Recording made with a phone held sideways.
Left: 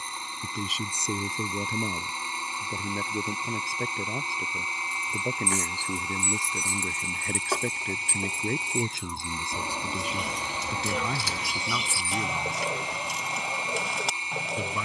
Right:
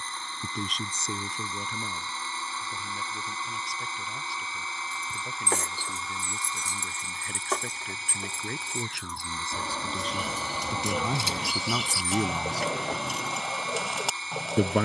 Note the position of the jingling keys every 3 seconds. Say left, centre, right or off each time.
off, right, centre, centre, right.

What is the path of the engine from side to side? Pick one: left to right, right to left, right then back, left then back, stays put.
stays put.